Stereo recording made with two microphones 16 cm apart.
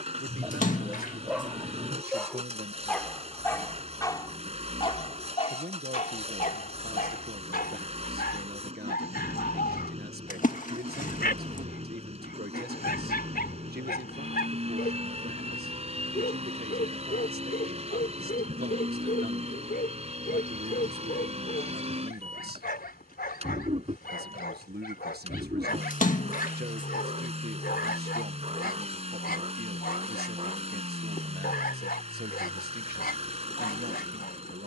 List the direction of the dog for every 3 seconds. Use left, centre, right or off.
centre, left, left, left, left, left, left, left, left, left, left, left.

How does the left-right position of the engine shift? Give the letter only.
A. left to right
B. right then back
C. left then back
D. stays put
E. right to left
D.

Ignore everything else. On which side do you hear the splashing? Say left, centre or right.
left.